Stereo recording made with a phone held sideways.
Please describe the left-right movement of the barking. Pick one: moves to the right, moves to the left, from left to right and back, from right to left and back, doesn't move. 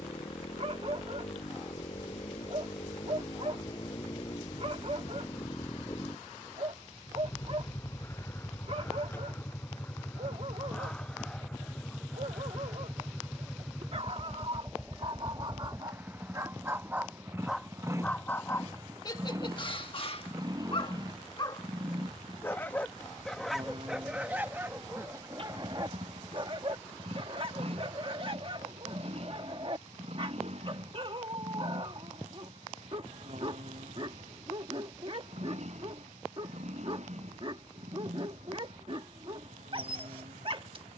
from right to left and back.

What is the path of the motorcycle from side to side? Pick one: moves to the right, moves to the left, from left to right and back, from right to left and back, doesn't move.
moves to the right.